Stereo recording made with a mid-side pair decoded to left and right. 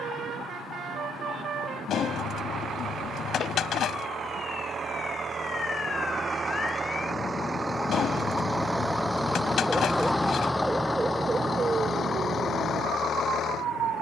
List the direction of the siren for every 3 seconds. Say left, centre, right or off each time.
left, left, left, centre, right.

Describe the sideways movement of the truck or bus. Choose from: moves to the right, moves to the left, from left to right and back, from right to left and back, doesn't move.
moves to the left.